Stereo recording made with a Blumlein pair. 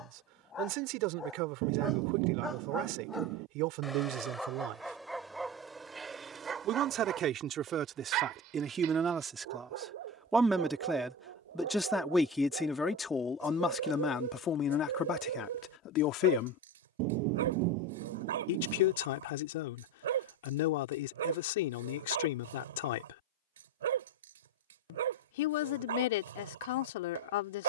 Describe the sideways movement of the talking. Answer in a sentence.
You can hear the talking travel towards the left.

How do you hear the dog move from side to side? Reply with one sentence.
You can hear the dog go from the left side to the right.